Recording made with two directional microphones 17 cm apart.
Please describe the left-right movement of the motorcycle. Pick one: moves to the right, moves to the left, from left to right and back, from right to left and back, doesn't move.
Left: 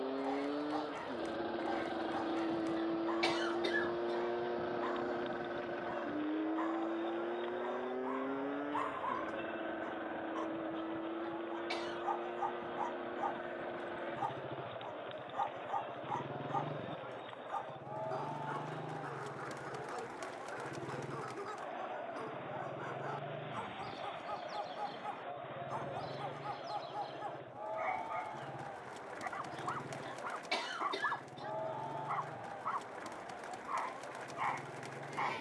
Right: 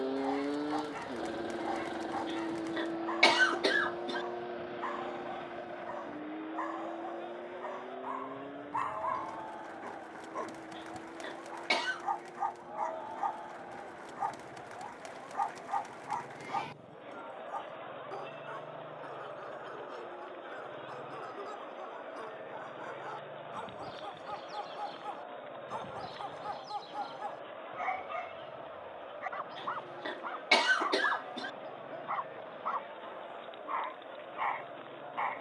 moves to the left.